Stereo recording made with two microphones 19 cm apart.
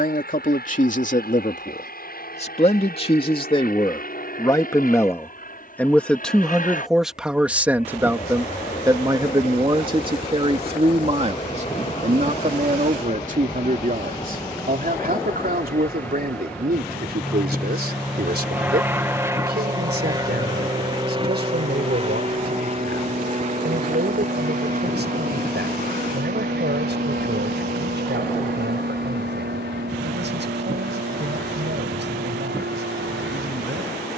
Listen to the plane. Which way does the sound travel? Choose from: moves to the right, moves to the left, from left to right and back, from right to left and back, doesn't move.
moves to the right.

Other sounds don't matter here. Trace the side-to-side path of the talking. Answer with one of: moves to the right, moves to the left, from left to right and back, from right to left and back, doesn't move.
moves to the right.